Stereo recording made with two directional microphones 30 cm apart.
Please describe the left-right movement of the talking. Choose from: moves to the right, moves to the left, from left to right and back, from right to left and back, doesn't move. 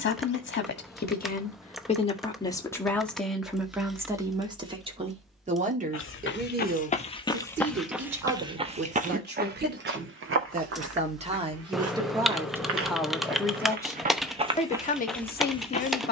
from left to right and back.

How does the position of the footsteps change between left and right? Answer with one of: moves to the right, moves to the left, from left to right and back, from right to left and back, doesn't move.
from left to right and back.